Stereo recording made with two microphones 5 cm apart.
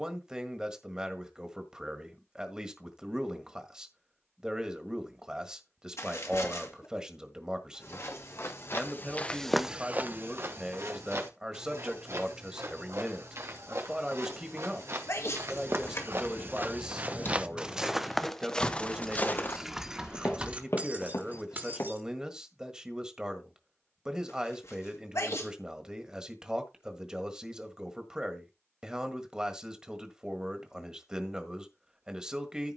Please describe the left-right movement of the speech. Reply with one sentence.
In this clip you hear the speech stay put.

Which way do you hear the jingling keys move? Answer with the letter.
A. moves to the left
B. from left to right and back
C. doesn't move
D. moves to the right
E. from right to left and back
D.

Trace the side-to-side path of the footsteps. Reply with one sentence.
In this clip you hear the footsteps move from left to right and back again.